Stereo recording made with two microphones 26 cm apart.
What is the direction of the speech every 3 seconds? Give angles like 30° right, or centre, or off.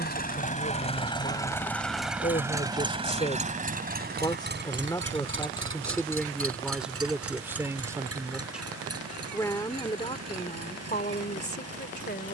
40° left, 10° left, centre, 30° left.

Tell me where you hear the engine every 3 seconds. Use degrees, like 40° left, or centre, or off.
10° left, 40° right, 60° right, 70° right.